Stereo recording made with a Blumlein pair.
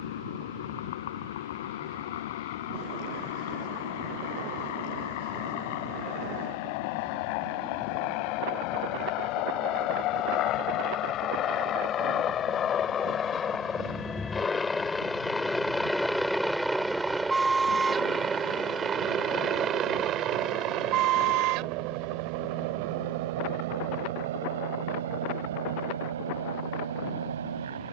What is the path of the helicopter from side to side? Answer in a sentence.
You can hear the helicopter travel towards the right.